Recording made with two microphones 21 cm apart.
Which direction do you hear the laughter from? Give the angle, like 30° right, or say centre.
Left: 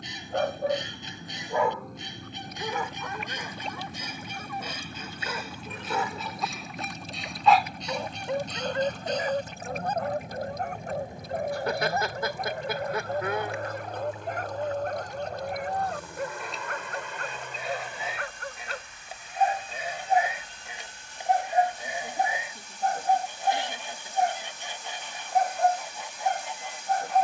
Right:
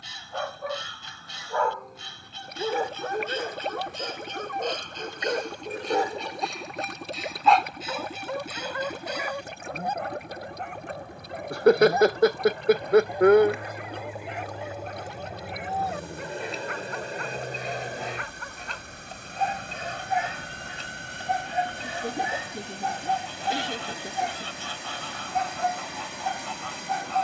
70° right.